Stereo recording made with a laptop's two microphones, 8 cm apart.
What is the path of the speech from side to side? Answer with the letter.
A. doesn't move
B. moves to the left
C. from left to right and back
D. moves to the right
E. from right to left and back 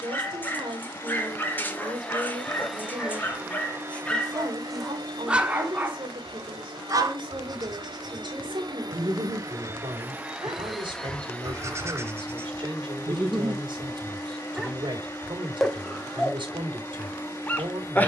A.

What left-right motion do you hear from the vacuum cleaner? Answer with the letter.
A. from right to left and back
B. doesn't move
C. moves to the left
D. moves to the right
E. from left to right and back
E.